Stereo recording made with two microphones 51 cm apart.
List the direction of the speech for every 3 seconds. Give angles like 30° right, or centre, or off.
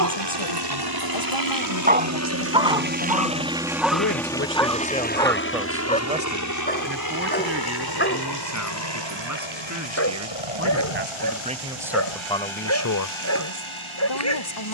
70° left, 20° left, 30° right, 30° right, 30° left.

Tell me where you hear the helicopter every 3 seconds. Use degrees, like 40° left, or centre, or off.
40° right, 10° left, 40° left, 50° left, 60° left.